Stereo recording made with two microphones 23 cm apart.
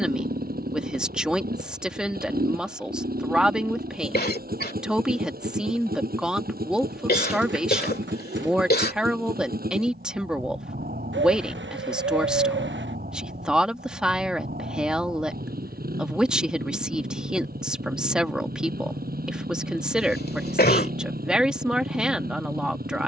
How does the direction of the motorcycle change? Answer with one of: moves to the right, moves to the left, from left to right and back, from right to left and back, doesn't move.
doesn't move.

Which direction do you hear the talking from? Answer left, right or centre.
centre.